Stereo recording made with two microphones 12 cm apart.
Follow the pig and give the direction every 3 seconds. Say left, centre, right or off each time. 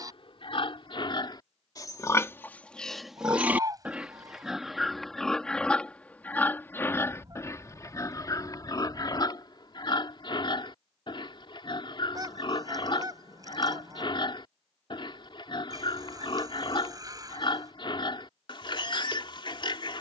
left, centre, left, left, left, left, left.